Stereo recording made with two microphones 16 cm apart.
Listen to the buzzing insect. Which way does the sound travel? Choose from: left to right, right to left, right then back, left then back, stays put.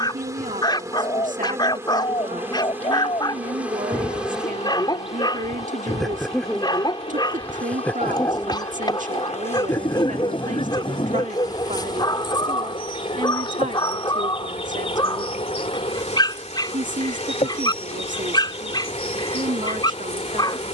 right to left.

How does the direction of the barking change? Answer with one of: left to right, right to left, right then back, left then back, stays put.
stays put.